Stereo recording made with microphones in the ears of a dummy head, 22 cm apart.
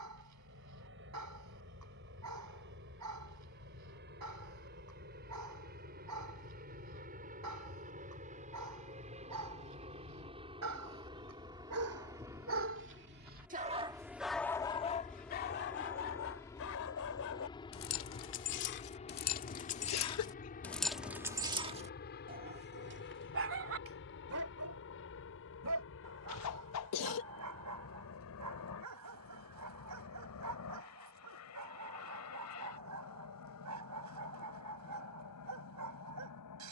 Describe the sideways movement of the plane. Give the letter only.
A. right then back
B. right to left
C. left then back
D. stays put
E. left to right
B.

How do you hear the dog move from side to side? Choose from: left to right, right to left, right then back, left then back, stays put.
left then back.